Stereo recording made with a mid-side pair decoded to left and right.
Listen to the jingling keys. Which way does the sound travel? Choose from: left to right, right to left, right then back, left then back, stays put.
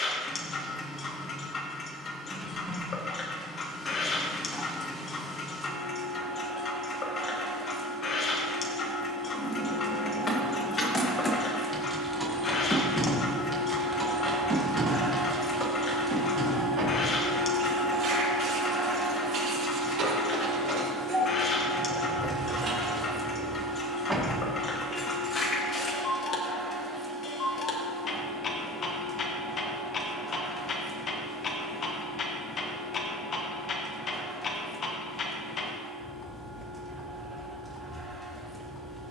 right then back.